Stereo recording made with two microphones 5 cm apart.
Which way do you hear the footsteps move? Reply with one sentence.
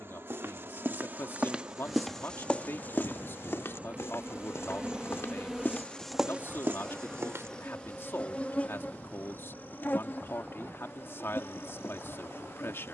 You can hear the footsteps go left and come back.